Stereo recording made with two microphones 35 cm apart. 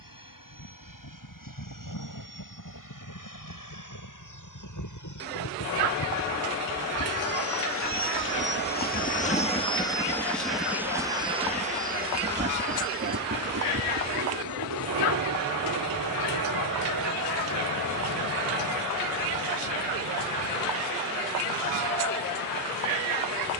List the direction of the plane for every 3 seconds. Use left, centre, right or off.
left, left, left, centre, right, right, right, right.